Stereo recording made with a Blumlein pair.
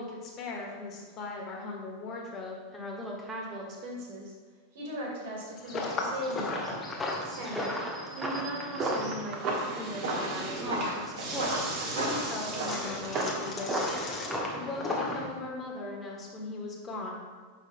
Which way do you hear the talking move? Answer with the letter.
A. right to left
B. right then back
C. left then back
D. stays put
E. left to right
B.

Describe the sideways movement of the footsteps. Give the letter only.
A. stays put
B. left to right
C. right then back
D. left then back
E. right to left
C.